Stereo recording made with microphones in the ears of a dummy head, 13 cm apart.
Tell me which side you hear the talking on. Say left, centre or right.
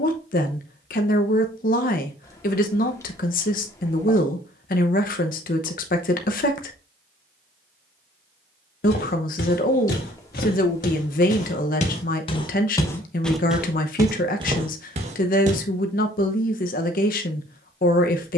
left.